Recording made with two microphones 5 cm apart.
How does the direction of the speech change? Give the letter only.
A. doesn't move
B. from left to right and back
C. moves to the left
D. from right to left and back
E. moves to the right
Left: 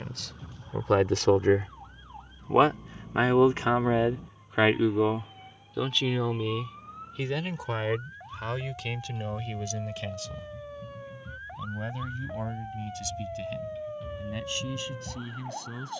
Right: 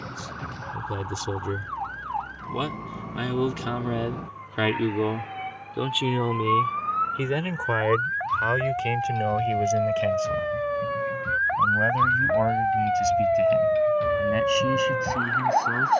E.